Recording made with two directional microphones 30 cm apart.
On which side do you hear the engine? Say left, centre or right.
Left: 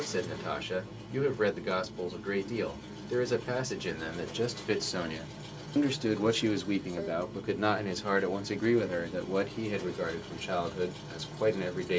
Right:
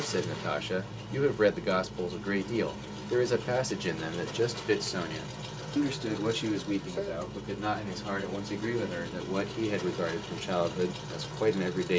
right.